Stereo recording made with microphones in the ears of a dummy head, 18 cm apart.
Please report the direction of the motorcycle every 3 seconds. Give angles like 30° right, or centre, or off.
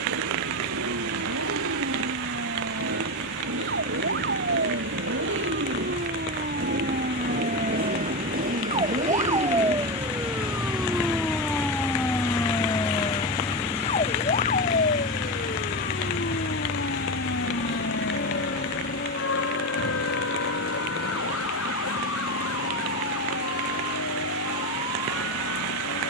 80° right, 70° right, 50° right, 20° right, 10° left, 30° left, 40° left, 50° left, 50° left.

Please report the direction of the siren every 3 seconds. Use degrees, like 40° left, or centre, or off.
60° right, 50° right, 30° right, 10° right, 20° left, 50° left, 60° left, 70° left, 70° left.